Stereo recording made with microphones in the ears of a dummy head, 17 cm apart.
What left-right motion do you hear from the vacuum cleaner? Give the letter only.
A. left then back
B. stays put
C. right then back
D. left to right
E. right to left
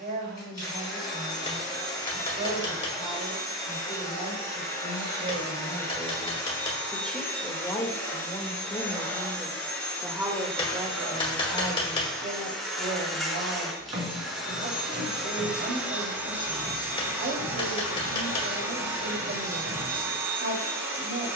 D.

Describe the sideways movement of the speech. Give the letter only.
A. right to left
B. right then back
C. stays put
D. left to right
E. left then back
E.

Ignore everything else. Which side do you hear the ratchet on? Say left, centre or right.
right.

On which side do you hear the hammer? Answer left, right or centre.
left.